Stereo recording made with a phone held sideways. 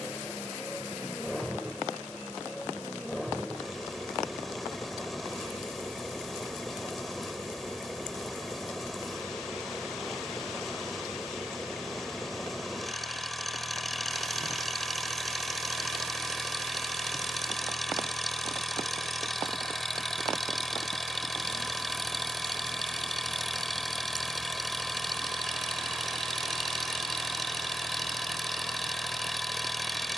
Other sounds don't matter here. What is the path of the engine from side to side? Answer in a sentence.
You can hear the engine stay in one place.